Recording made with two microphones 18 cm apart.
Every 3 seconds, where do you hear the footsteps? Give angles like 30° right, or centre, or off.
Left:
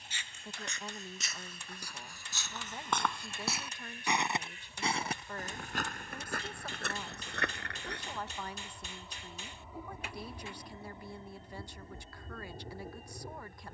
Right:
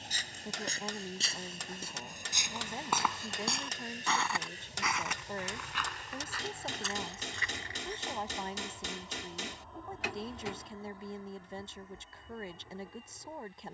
30° right, 20° left, 60° left, off, off.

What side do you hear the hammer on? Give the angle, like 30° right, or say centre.
80° right.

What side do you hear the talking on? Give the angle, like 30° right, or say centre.
20° right.